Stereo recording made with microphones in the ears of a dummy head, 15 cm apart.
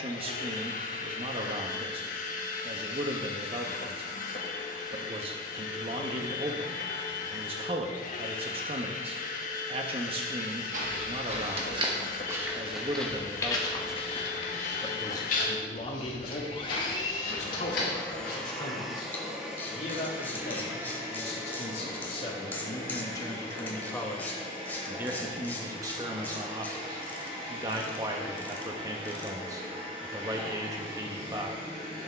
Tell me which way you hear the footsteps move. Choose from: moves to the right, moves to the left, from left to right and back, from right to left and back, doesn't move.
moves to the left.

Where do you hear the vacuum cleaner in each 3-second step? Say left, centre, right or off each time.
left, left, left, left, left, left, centre, right, right, right, right.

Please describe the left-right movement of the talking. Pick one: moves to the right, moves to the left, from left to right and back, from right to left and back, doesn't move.
from right to left and back.